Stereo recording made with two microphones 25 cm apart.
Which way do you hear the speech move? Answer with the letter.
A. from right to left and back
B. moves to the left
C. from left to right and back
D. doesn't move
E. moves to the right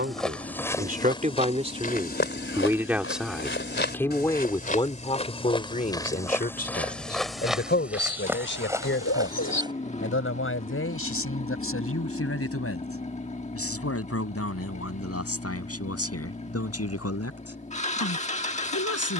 B.